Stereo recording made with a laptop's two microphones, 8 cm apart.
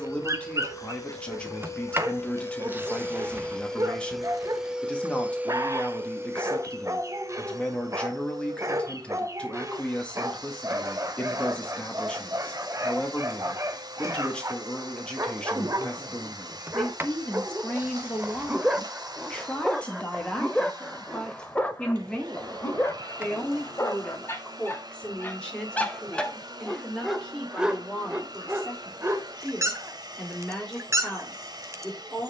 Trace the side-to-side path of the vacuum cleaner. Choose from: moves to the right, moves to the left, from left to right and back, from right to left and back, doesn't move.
moves to the right.